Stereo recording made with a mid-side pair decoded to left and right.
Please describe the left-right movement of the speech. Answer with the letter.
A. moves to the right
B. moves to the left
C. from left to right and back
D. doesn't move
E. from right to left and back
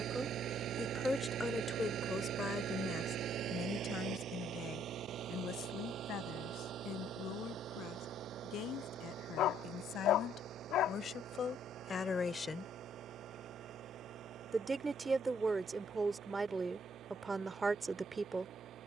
E.